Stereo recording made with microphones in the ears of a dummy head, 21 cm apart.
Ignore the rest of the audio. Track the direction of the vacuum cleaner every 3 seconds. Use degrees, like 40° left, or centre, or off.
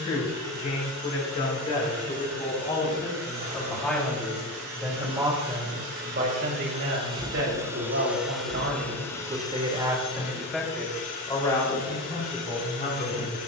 70° right, 60° right, 20° right, 30° left, 50° left.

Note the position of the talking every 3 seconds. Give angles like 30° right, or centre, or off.
30° left, centre, 60° right, centre, 30° left.